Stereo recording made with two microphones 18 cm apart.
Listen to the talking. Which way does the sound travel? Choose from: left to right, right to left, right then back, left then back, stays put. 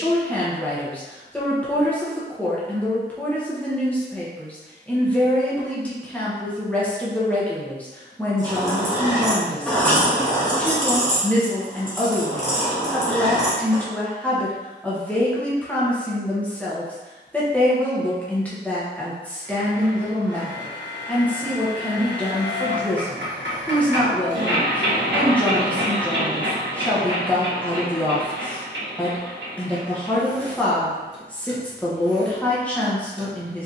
stays put.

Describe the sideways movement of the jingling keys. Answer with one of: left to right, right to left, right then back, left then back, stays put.
left then back.